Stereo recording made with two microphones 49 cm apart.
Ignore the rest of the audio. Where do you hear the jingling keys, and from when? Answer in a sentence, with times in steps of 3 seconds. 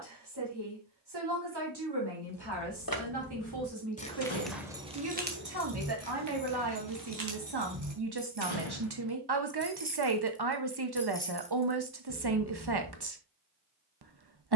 You can hear the jingling keys on the left from 0 s, in the centre from 3 s, on the right from 6 s, in the centre from 9 s and on the left from 12 s.